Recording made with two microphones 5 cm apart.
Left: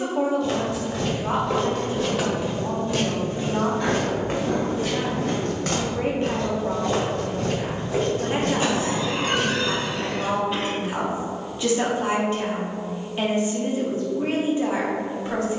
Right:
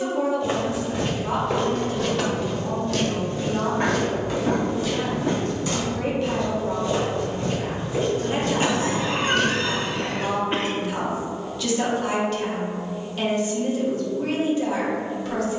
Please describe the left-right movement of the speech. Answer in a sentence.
In this clip you hear the speech stay in one place.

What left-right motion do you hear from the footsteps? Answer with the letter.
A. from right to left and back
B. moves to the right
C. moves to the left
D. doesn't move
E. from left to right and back
A.